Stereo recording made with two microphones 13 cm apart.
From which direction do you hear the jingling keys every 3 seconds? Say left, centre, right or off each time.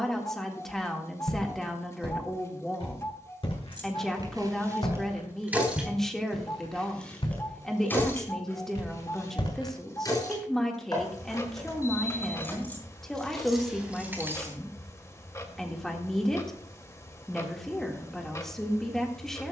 off, right, centre, left, centre, off, off.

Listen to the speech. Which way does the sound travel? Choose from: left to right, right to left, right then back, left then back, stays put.
stays put.